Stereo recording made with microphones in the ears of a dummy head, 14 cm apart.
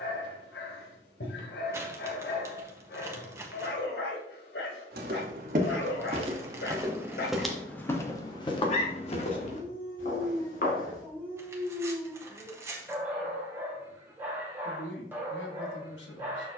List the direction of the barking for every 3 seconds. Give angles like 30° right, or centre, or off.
80° left, 80° left, 60° left, 20° left, 10° right, 10° right.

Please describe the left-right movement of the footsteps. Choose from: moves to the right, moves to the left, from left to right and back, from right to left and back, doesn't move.
moves to the left.